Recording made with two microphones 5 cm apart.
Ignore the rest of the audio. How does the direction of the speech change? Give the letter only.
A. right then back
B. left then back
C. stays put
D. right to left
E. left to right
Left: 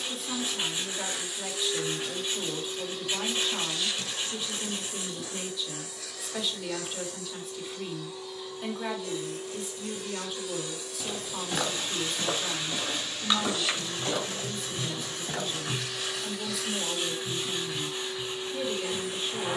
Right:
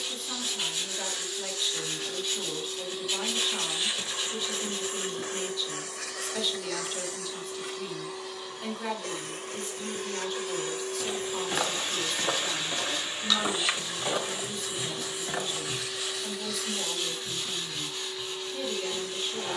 C.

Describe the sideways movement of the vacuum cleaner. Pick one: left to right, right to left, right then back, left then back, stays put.
right then back.